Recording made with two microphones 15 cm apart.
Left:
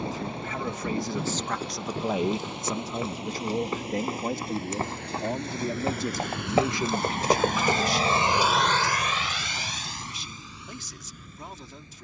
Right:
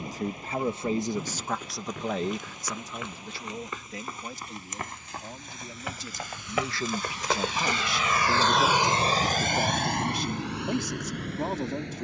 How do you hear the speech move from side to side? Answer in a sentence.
In this clip you hear the speech move from right to left and back again.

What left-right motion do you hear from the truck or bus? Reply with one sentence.
In this clip you hear the truck or bus move from left to right.